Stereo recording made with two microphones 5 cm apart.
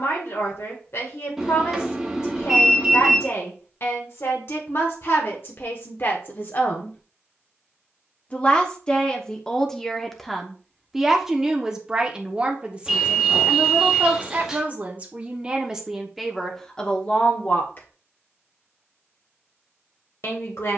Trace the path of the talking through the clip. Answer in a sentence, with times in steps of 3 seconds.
In this clip you hear the talking on the left from 0 s, in the centre from 9 s, on the right from 12 s, in the centre from 15 s and on the left from 18 s.